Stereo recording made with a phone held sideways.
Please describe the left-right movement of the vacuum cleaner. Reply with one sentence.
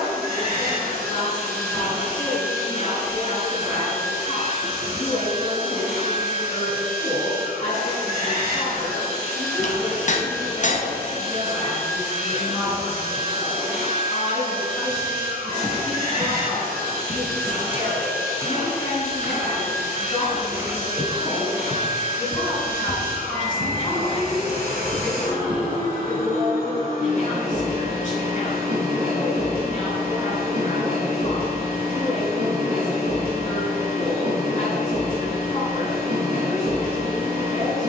In this clip you hear the vacuum cleaner stay put.